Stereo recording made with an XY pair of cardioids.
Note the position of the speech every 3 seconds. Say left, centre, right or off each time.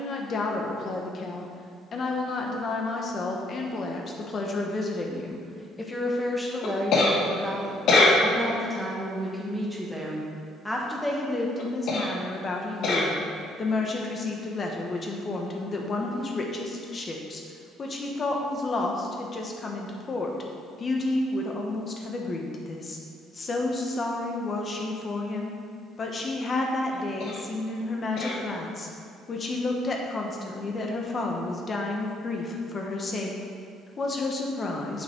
left, left, centre, centre, left, left, left, left, left, left, left, left.